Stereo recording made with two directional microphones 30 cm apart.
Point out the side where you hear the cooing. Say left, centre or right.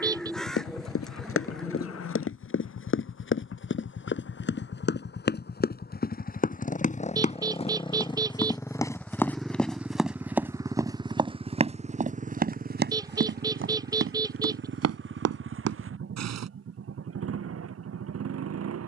centre.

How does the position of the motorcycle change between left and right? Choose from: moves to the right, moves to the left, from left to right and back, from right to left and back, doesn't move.
moves to the right.